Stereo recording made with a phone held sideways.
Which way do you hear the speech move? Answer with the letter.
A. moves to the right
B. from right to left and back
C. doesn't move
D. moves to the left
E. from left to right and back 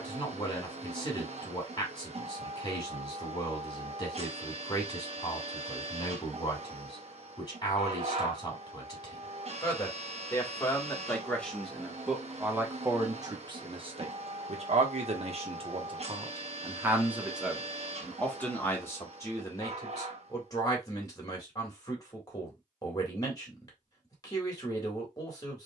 E.